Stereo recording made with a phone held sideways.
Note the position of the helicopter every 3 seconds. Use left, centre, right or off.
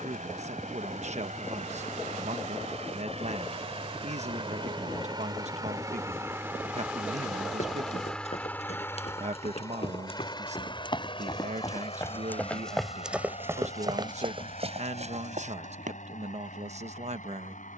right, right, centre, left, left, left.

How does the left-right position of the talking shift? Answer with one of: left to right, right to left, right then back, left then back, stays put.
stays put.